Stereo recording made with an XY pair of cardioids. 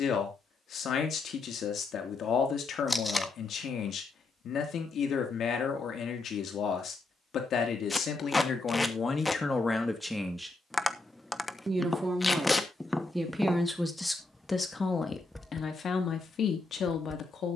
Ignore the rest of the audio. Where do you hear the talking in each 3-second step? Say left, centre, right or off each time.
left, left, left, centre, centre, left.